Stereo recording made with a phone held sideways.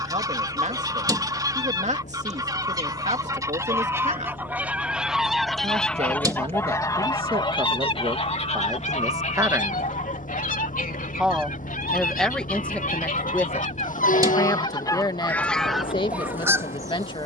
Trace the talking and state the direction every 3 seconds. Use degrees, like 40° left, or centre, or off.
50° right, 50° right, 40° right, 10° right, 20° left, 30° left.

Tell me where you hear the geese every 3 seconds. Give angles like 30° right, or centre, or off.
30° right, 10° right, 30° left, 70° left, 60° left, 10° right.